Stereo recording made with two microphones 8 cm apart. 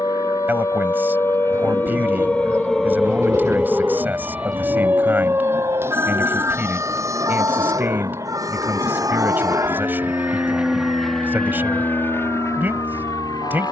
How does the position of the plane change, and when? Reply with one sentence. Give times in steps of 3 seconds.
You can hear the plane on the right from 0 s, in the centre from 9 s and on the left from 12 s.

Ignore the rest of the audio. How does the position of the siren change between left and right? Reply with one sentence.
In this clip you hear the siren go from the left side to the right.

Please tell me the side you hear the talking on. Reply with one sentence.
In this clip you hear the talking on the right.